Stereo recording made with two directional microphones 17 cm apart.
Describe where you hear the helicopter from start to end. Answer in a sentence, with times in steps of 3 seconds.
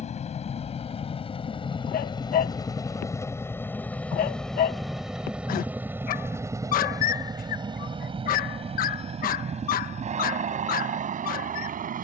In this clip you hear the helicopter on the left from 0 s, in the centre from 3 s and on the right from 6 s.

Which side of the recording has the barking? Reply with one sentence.
You can hear the barking on the left.